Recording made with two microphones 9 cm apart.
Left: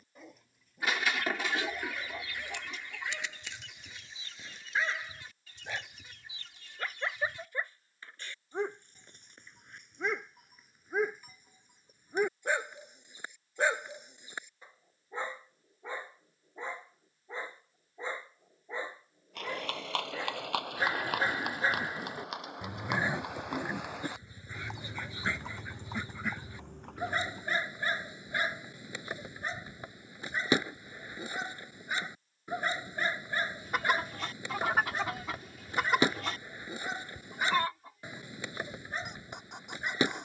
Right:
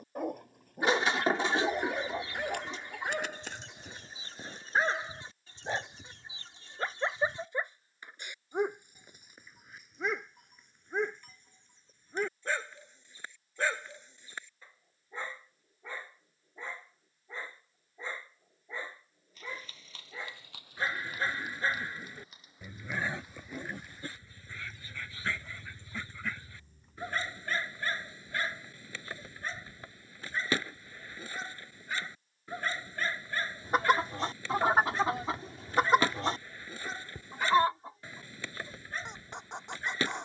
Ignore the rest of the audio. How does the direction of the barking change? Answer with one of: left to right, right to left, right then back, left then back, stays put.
right to left.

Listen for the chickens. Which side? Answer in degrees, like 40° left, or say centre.
30° right.